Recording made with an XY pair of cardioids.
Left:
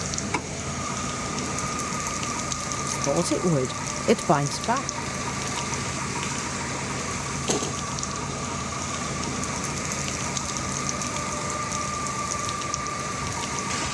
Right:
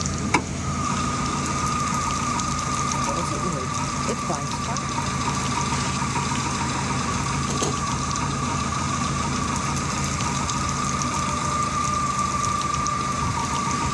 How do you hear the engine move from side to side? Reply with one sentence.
In this clip you hear the engine stay in one place.